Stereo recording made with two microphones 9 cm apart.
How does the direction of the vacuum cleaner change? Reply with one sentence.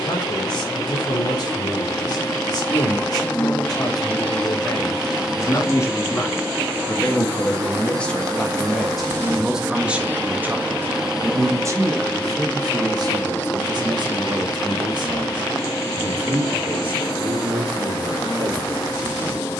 You can hear the vacuum cleaner move from left to right and back again.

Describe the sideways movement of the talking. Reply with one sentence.
You can hear the talking travel towards the right.